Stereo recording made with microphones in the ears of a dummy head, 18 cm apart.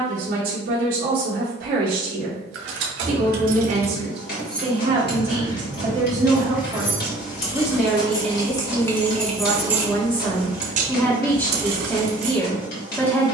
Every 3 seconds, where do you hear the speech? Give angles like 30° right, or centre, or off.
50° right, 30° right, centre, 10° left, 10° left.